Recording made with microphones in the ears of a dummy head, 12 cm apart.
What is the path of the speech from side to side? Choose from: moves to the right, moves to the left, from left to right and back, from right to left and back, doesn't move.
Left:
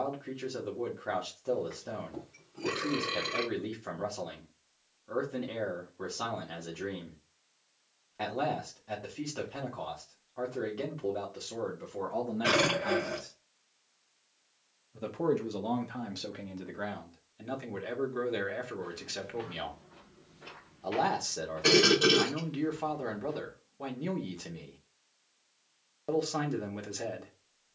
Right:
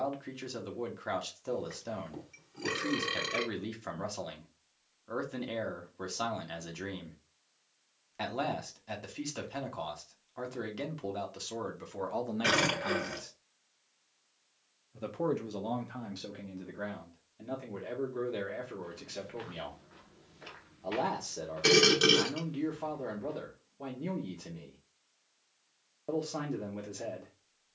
moves to the left.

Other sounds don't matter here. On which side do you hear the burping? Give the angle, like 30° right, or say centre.
80° right.